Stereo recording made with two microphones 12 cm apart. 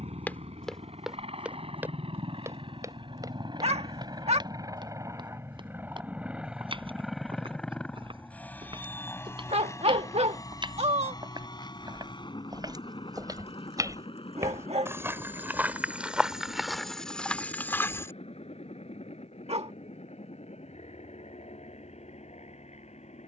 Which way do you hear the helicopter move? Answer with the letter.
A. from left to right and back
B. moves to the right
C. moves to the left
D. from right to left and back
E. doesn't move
C.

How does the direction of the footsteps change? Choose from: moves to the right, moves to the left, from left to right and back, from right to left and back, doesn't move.
from left to right and back.